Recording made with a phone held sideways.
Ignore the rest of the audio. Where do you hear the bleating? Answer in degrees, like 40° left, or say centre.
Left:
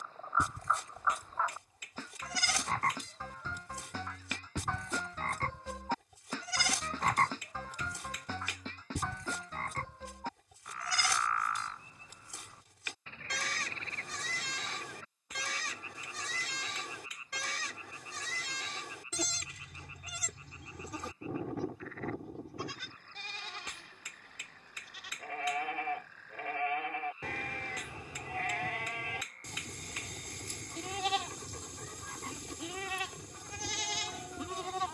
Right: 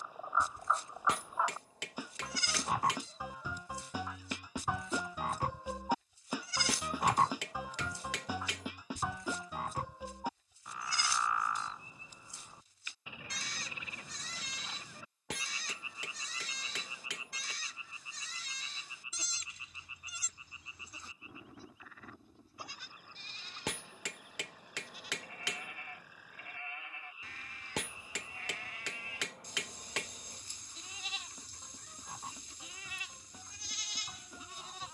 70° left.